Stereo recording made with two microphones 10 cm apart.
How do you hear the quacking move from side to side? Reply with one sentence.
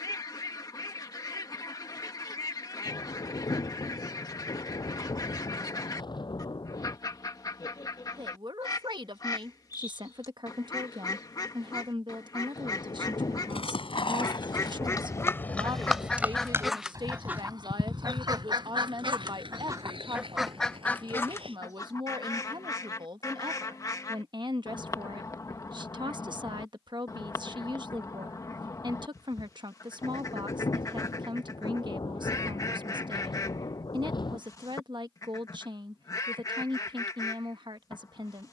You can hear the quacking go right and come back.